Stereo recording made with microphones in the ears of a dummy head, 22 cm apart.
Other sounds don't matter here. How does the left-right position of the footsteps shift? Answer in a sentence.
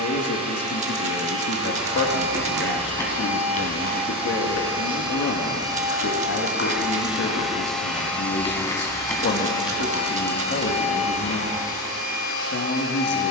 In this clip you hear the footsteps go left and come back.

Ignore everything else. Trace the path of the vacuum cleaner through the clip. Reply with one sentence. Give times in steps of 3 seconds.
In this clip you hear the vacuum cleaner on the right from 0 s, in the centre from 6 s and on the left from 9 s.